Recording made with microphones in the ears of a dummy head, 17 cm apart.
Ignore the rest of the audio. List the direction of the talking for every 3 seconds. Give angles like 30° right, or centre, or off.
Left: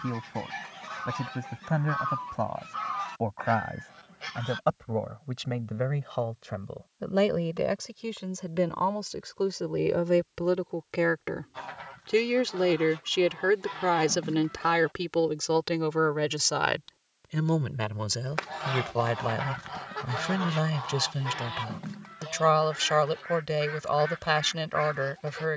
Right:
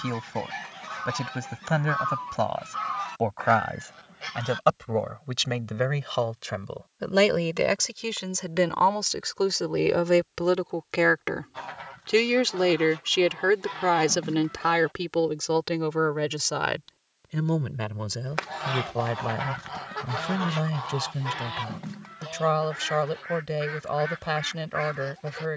80° right, 80° right, 60° right, 50° right, 20° right, 10° left, 30° left, 30° left, 30° left.